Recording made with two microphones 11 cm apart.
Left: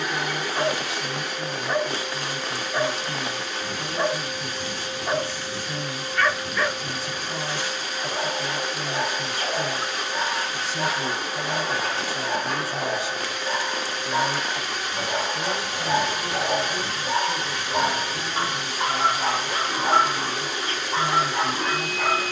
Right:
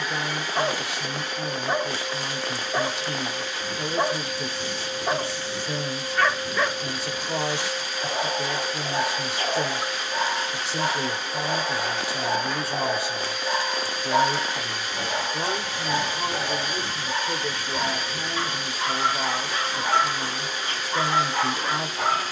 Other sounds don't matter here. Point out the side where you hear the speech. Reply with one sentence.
In this clip you hear the speech on the right.